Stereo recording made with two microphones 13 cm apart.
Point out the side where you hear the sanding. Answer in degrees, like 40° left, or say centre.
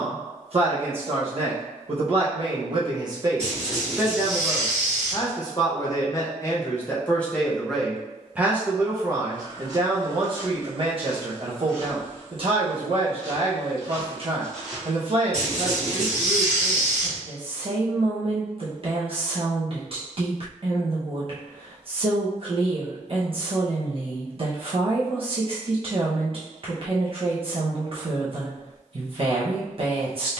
60° right.